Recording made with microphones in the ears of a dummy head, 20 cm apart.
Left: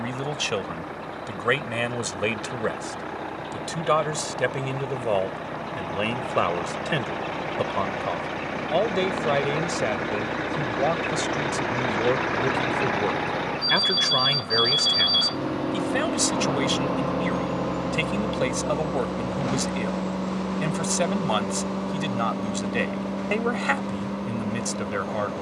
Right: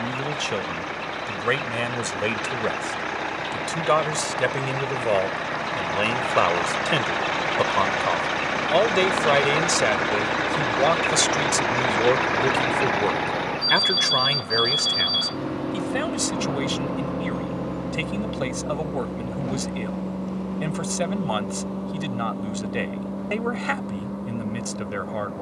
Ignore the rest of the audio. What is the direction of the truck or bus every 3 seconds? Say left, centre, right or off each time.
right, right, right, right, centre, left, left, left, left.